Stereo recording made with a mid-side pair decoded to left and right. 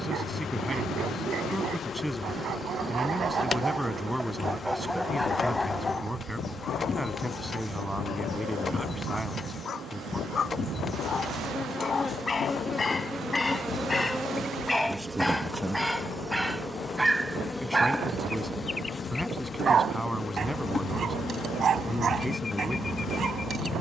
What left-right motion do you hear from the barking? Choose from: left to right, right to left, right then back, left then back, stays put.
left then back.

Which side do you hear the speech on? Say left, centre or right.
centre.